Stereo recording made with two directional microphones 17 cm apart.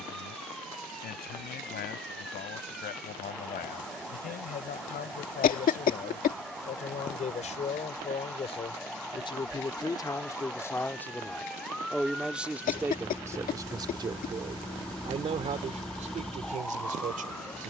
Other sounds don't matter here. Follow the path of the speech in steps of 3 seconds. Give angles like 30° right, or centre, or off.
60° left, 60° left, 40° left, 20° left, 20° right, 50° right.